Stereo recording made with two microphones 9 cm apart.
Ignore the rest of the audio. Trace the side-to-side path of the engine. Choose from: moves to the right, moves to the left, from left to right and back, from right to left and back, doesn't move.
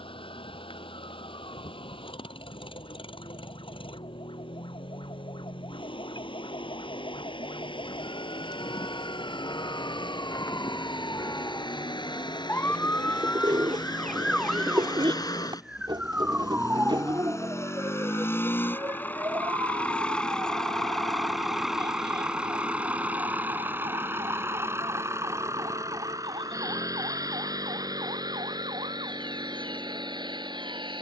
moves to the right.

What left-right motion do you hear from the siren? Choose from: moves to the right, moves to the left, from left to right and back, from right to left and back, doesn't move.
moves to the right.